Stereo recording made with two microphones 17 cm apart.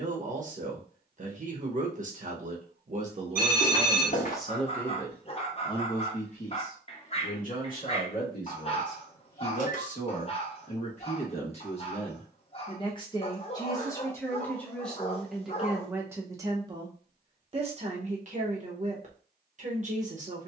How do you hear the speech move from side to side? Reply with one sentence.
In this clip you hear the speech go left and come back.